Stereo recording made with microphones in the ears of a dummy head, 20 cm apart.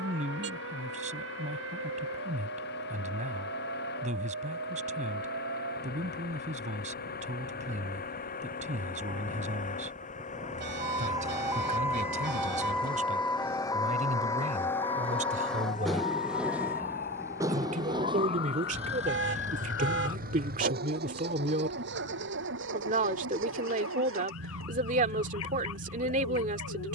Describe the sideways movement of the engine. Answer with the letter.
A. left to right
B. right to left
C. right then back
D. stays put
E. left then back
A.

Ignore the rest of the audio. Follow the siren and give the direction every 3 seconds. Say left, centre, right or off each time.
right, right, right, right, centre, left, left, left, left.